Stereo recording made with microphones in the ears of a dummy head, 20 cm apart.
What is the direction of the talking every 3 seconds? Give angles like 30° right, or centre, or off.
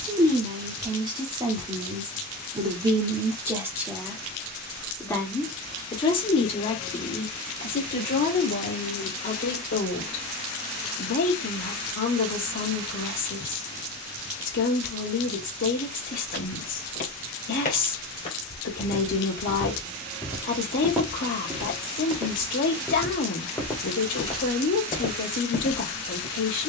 20° right, centre, 40° left, 50° left, 60° left, 60° left, 60° left, 60° left, 60° left.